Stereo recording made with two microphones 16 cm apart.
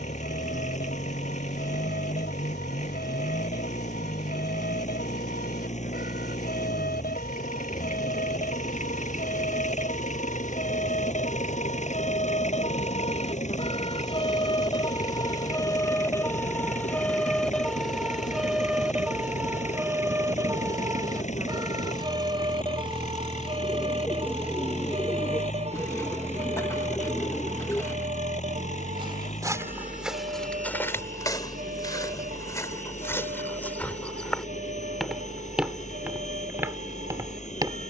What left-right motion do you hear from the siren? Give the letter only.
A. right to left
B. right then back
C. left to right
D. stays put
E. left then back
C.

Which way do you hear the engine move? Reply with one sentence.
You can hear the engine stay in one place.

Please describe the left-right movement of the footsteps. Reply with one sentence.
You can hear the footsteps move from right to left and back again.